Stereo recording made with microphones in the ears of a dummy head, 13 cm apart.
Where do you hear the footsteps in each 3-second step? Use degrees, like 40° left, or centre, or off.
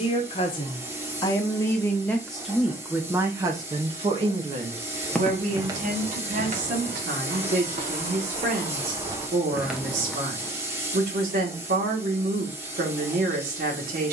off, 10° right, 50° right, 10° right, off.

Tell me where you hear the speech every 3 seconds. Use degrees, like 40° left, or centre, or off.
20° left, 40° right, 60° right, 60° right, 60° right.